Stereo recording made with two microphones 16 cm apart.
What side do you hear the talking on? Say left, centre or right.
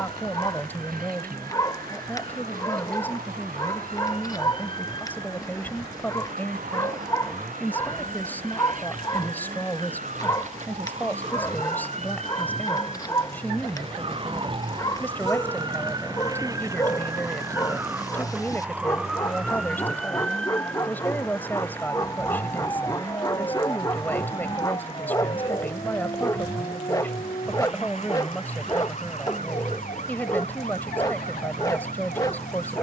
centre.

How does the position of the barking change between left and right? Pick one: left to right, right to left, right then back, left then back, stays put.
stays put.